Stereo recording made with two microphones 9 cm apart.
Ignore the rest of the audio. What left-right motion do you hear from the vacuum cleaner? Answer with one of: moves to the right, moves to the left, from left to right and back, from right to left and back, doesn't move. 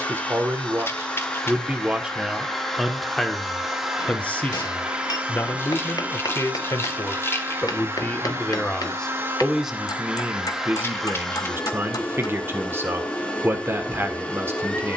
from left to right and back.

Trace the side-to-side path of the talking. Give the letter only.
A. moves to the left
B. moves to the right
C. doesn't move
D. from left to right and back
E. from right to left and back
E.